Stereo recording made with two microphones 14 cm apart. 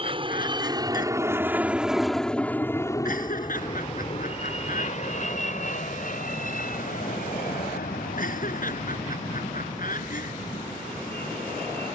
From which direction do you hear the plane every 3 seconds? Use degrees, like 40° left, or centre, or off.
10° right, 40° left, 60° left, 70° left.